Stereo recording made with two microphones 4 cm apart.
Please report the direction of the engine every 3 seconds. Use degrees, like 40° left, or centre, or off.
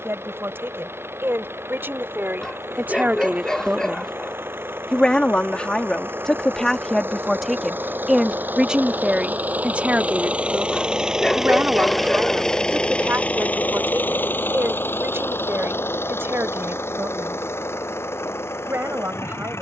70° right, 60° right, 50° right, 30° right, 30° left, 70° left, 80° left.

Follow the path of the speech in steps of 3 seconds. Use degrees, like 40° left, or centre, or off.
60° right, centre, centre, 40° right, 60° right, 60° right, 70° right.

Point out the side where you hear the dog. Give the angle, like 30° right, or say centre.
20° left.